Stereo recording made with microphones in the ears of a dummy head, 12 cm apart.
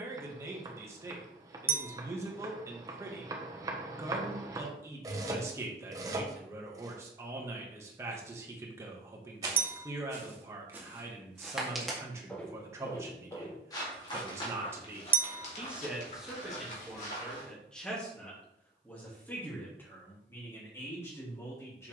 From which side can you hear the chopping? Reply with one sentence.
In this clip you hear the chopping on the right.